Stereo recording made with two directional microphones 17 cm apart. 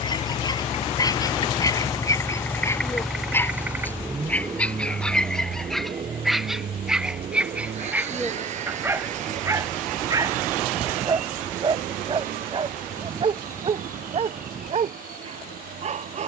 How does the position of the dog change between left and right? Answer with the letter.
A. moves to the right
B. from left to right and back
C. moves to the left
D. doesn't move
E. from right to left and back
A.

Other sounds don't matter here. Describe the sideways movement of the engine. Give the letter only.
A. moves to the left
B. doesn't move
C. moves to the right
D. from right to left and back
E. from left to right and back
C.